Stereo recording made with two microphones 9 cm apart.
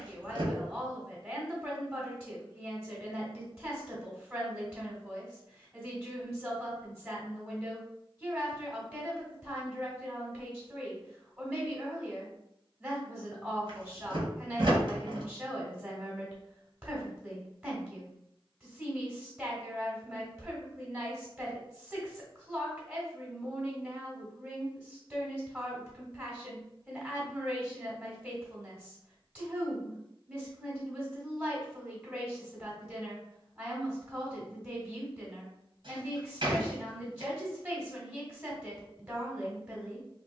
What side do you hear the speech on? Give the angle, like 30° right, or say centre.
10° right.